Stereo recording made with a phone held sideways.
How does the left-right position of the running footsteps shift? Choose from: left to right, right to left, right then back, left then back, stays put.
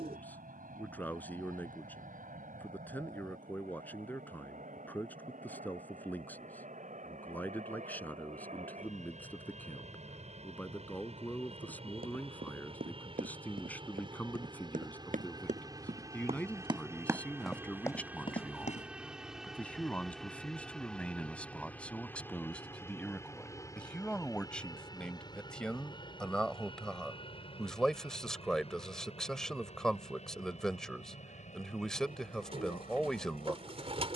right to left.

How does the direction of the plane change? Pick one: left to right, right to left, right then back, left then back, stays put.
right to left.